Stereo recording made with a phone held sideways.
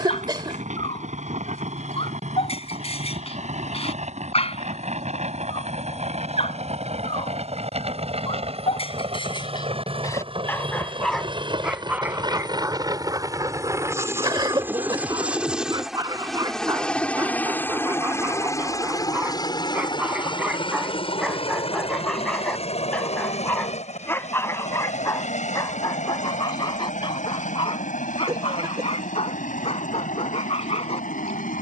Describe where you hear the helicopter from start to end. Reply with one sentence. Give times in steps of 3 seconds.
You can hear the helicopter on the right from 0 s, in the centre from 15 s and on the left from 18 s.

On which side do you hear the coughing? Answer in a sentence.
You can hear the coughing on the right.